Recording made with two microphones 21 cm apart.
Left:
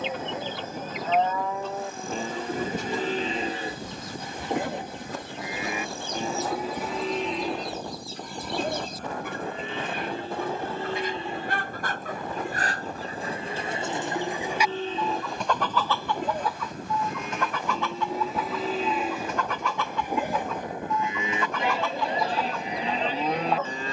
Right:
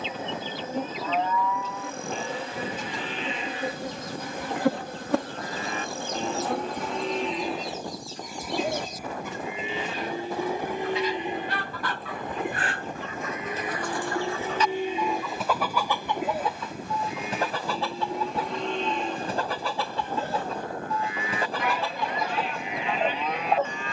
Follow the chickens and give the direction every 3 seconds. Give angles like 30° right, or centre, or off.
70° left, 70° left, 70° left, 50° left, 30° left, 20° right, 30° right, 30° right.